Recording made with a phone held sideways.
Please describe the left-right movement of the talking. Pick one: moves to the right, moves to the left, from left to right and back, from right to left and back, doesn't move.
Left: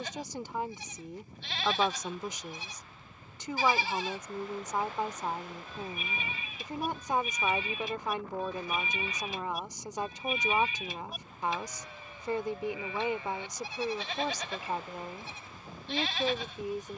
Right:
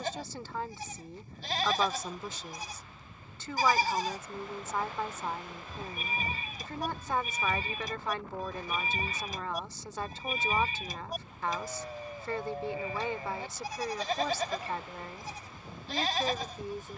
doesn't move.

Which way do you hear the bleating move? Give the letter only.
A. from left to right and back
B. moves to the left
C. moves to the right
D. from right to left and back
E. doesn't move
E.